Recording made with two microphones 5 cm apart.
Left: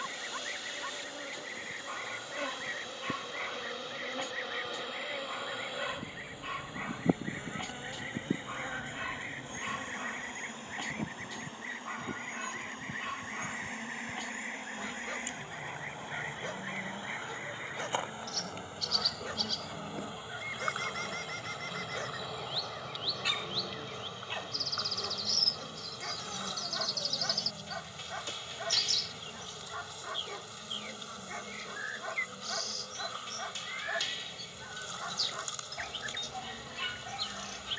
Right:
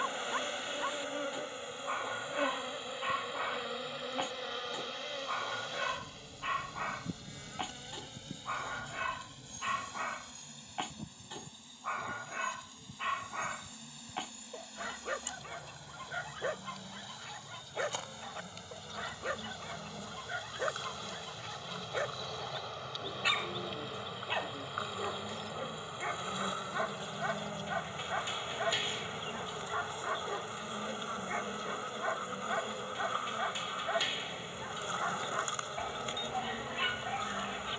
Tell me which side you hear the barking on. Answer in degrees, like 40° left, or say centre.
20° right.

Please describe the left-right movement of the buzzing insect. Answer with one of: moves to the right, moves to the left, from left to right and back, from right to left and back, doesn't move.
from right to left and back.